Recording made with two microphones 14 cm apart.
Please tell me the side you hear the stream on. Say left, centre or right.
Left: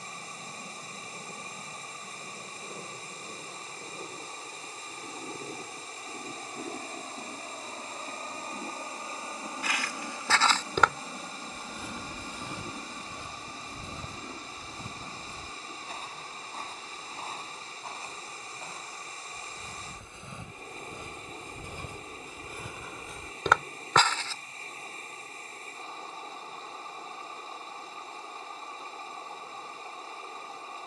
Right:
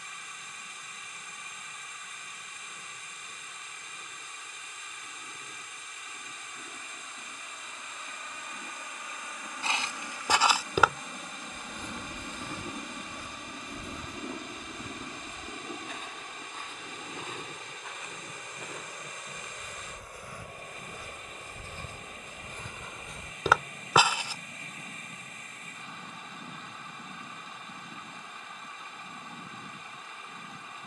left.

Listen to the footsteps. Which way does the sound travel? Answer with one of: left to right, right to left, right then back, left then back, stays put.
left then back.